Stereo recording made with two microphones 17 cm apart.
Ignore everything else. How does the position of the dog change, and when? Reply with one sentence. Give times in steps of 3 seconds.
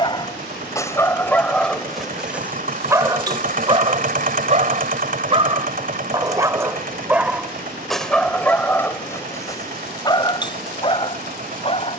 You can hear the dog in the centre from 0 s, on the right from 3 s, in the centre from 6 s and on the left from 9 s.